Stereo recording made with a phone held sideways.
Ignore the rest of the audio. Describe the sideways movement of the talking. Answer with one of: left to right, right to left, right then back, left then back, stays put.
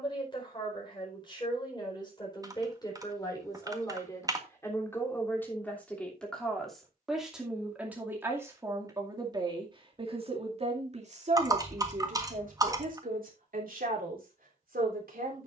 left to right.